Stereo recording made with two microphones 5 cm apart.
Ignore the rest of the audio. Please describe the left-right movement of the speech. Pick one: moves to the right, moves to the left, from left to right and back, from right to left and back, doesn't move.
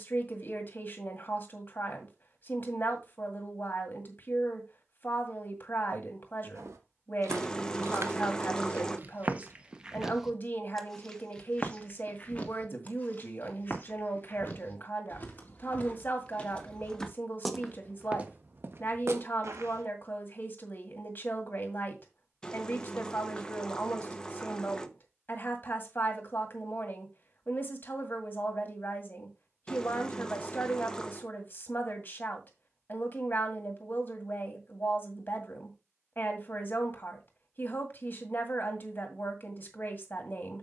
doesn't move.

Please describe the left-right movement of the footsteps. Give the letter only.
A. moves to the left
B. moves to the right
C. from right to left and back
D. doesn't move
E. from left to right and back
C.